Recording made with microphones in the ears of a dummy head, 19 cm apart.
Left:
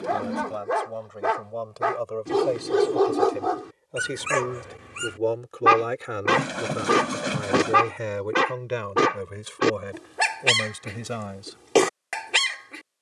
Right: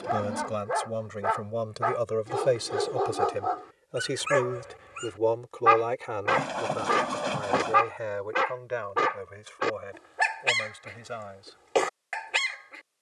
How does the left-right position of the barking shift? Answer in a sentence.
You can hear the barking stay in one place.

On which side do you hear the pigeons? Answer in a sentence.
In this clip you hear the pigeons on the left.